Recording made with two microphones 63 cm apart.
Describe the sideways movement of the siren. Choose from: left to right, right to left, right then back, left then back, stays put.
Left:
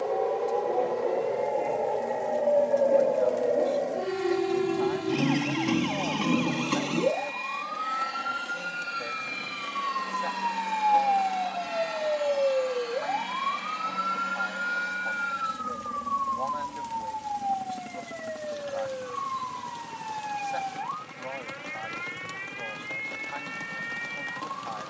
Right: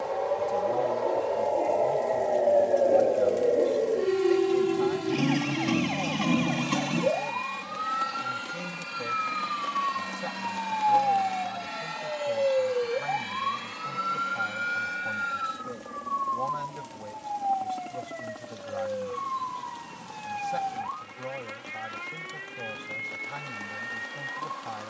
left to right.